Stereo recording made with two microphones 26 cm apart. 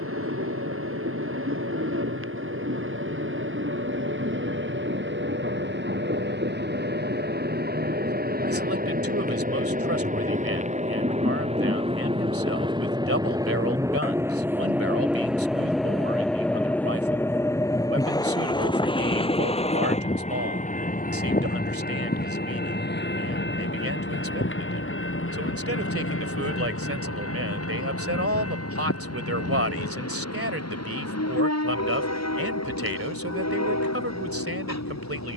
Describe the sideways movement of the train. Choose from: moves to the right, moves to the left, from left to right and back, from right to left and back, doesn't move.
moves to the left.